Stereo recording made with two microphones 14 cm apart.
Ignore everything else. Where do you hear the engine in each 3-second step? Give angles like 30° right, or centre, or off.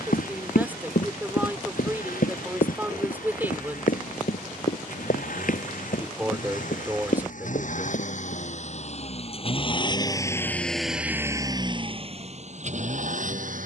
80° left, 70° left, 60° left, 10° left, 60° right.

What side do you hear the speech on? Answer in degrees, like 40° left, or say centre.
10° right.